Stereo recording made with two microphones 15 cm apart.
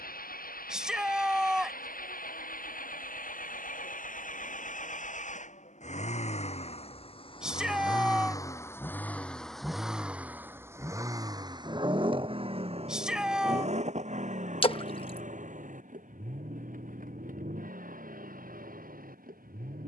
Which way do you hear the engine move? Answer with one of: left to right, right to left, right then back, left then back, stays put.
left to right.